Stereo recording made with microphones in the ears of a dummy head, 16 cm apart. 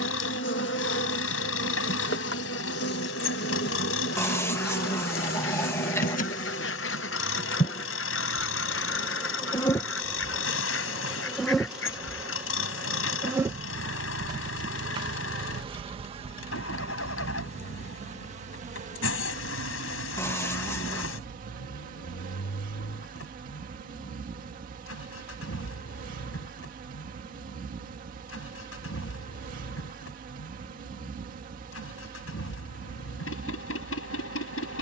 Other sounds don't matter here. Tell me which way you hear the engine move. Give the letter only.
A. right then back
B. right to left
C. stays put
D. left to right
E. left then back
C.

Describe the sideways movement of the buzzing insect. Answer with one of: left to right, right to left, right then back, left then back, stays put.
left to right.